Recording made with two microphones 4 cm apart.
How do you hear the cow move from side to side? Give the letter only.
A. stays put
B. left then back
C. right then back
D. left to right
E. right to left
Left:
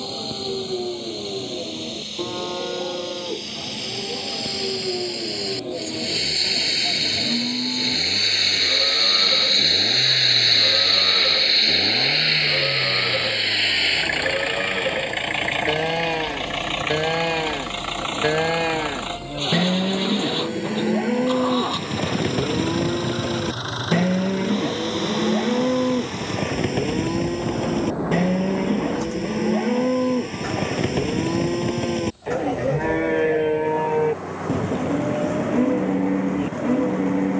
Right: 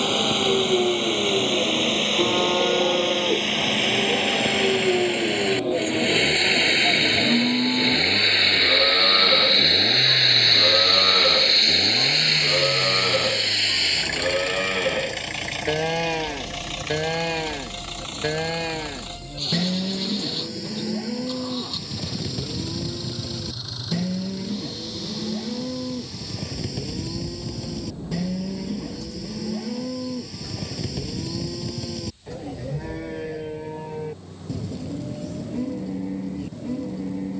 E.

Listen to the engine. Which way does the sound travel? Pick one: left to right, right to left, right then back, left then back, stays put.
right to left.